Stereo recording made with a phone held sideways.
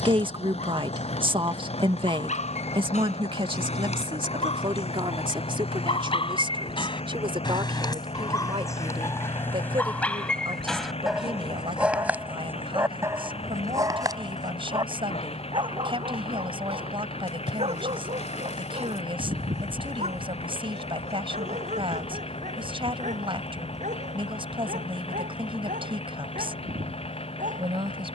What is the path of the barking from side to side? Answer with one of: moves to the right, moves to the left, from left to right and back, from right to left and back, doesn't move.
moves to the right.